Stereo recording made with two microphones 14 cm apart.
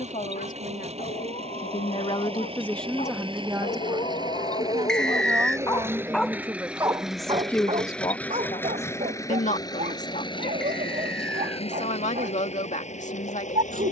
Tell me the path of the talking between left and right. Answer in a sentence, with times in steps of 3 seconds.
You can hear the talking on the left from 0 s, on the right from 3 s, in the centre from 6 s and on the left from 9 s.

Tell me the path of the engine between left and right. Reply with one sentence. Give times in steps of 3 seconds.
You can hear the engine on the right from 0 s, in the centre from 6 s and on the left from 9 s.